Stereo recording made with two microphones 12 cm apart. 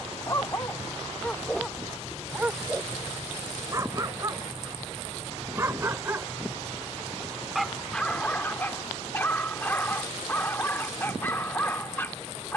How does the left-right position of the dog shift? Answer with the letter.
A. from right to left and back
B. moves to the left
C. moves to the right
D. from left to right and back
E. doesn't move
D.